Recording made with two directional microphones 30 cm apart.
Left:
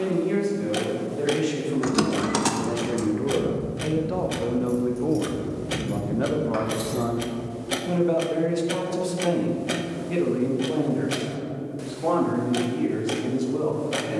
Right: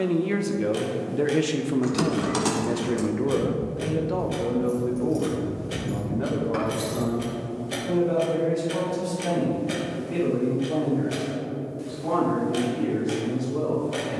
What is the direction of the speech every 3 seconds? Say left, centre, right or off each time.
right, centre, left, left, left.